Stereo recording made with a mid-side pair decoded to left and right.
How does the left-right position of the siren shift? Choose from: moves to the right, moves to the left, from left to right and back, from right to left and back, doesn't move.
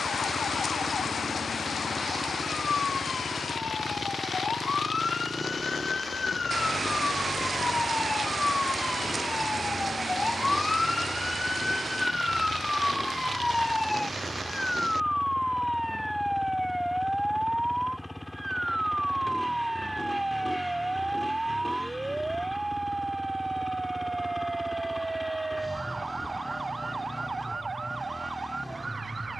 moves to the right.